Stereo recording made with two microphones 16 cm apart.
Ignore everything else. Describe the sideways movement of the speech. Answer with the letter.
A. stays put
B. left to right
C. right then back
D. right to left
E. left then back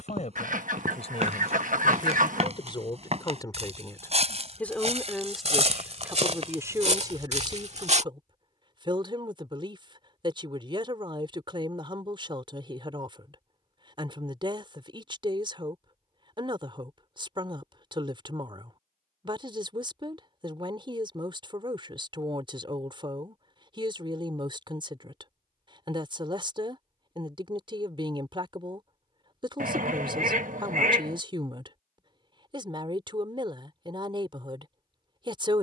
B.